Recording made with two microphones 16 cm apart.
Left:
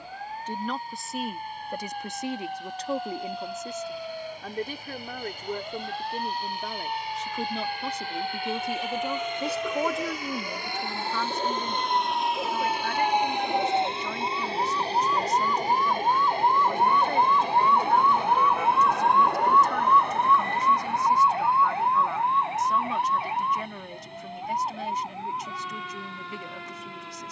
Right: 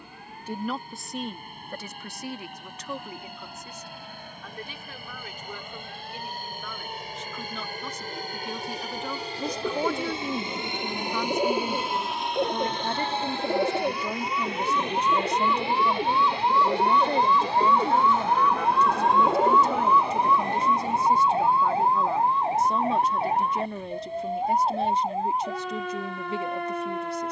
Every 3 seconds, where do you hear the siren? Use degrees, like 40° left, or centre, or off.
70° left, 70° left, 70° left, 60° left, 50° left, 30° left, centre, 40° right, 50° right.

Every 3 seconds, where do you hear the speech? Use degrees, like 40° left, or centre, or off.
10° left, 50° left, 30° left, 10° right, 30° right, 30° right, 30° right, 30° right, 30° right.